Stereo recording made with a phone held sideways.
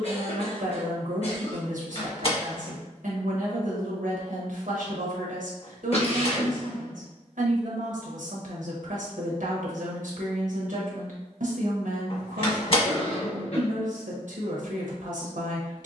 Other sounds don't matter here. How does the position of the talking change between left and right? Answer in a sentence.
You can hear the talking stay in one place.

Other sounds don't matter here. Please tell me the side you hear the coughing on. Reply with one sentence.
You can hear the coughing on the left.